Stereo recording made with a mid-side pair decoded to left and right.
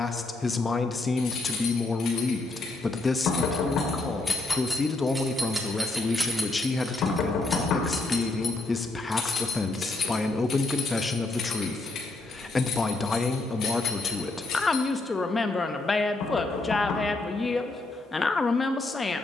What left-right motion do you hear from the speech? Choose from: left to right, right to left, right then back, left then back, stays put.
stays put.